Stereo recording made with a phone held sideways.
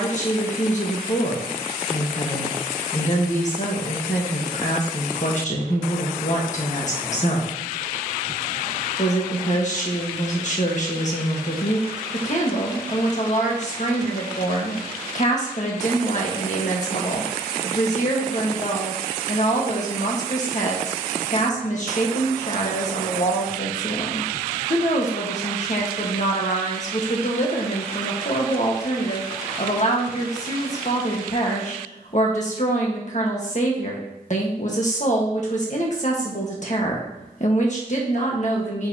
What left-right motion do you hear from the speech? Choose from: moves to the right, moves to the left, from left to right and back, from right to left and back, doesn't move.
doesn't move.